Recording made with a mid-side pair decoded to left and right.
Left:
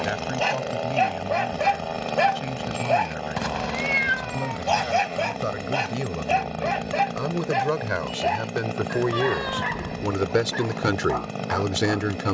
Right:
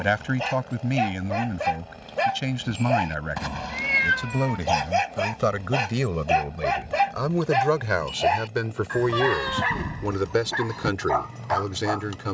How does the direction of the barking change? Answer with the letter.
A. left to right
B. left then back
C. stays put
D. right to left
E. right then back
A.